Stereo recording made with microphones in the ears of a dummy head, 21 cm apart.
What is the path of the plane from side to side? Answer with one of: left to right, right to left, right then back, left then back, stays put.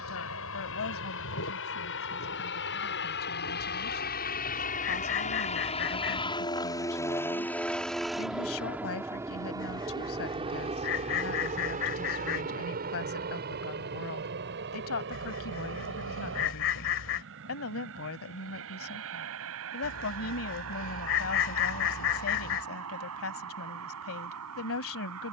left to right.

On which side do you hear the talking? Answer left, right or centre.
left.